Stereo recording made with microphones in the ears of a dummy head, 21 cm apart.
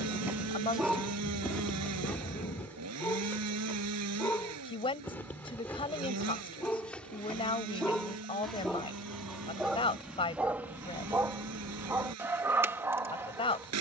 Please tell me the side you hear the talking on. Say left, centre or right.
left.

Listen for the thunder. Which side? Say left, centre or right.
left.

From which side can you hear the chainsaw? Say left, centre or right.
right.